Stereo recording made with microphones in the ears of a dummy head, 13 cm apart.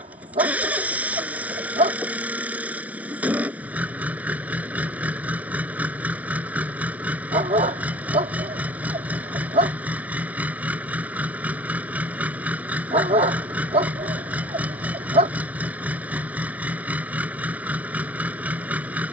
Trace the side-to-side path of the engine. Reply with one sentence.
You can hear the engine stay put.